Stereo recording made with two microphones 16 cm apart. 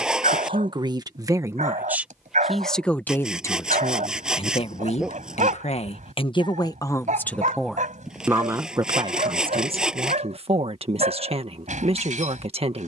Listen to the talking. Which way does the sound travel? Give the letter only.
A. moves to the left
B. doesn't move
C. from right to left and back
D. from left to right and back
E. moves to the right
C.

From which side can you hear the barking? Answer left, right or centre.
right.